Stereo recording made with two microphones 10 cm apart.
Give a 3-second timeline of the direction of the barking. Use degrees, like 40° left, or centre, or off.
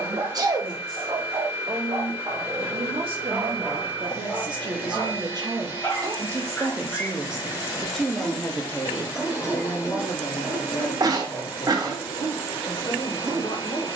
40° right, 10° left, 10° left, 10° right, 30° right.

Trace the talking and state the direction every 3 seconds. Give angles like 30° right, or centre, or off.
70° right, 50° right, centre, 40° left, 60° left.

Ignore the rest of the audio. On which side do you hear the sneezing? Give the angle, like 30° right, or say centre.
40° right.